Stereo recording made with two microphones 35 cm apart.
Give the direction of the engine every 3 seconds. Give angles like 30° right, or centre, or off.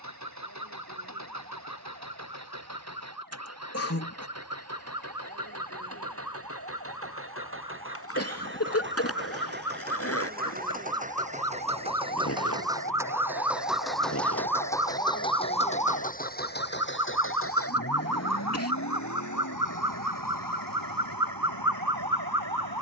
50° right, 40° right, 40° right, 20° right, centre, 30° left, 50° left, 70° left.